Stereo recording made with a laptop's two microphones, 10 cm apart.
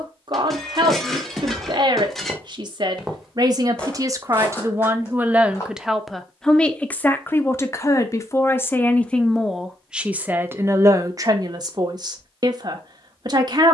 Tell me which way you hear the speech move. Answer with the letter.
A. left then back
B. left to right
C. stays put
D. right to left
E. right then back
A.